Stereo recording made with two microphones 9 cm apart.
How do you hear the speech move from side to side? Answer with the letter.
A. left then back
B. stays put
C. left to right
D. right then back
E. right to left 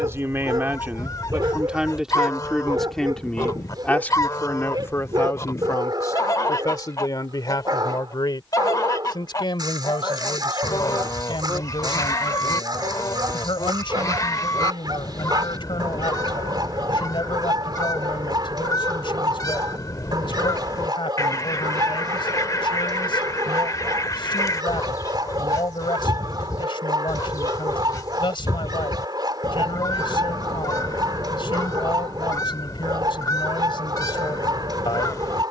E.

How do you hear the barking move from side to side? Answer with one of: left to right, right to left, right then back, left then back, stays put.
stays put.